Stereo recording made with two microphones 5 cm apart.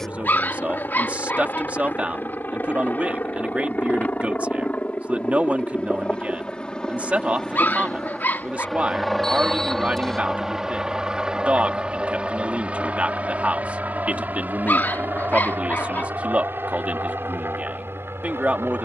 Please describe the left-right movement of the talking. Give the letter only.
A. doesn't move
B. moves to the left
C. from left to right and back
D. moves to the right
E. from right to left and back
A.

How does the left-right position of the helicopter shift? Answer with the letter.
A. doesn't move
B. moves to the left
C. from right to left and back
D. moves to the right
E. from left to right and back
D.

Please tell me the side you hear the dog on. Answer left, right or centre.
left.